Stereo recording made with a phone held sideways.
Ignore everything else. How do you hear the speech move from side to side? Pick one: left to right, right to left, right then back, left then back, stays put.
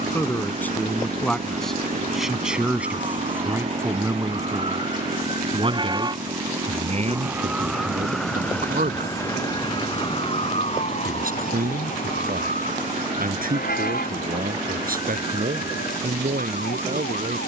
left to right.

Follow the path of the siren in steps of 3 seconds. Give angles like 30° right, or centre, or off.
50° right, 40° right, 10° right, 40° left, 70° left, 80° left.